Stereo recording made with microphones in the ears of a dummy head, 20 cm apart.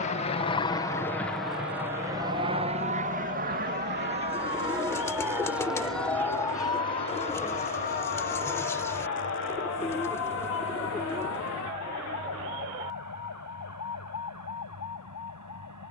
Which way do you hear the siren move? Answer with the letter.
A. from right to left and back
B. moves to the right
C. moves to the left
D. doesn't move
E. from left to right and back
C.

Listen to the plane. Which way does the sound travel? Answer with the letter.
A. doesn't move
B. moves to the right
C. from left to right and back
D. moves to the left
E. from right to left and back
B.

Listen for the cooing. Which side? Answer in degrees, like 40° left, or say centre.
10° left.